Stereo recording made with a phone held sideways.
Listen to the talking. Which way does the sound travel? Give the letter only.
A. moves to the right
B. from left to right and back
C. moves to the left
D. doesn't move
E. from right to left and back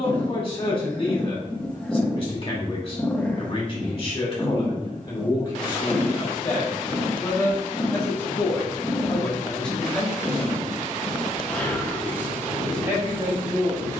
A.